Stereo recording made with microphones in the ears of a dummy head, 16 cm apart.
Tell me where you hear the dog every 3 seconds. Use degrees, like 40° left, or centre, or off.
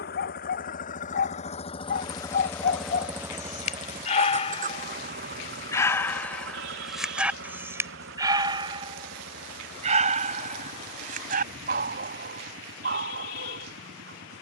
60° left, 40° left, 10° right, 50° right, 60° right.